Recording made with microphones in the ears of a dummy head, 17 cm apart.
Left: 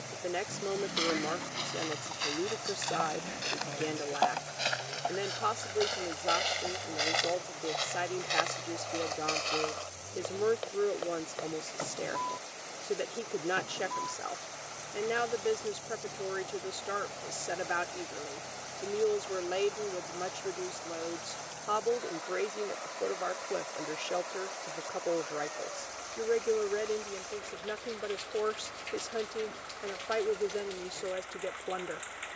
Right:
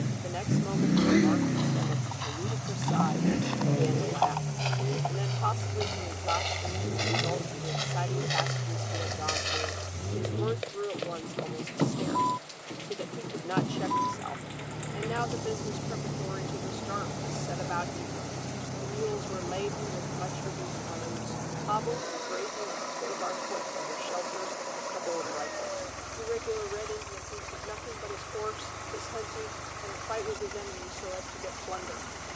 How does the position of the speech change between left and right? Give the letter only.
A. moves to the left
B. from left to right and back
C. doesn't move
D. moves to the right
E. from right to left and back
C.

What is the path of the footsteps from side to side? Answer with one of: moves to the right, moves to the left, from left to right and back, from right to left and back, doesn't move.
moves to the right.